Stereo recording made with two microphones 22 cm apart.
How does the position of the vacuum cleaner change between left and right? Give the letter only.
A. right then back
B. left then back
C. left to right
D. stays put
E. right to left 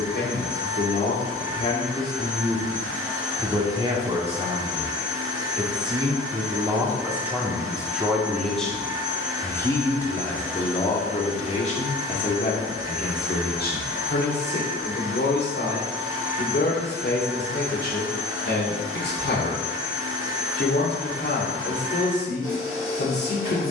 D.